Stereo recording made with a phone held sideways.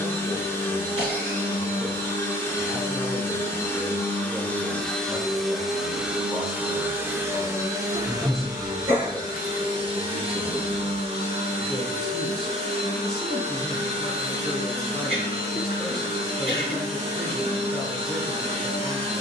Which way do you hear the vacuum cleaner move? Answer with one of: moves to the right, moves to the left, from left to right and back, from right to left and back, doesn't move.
moves to the right.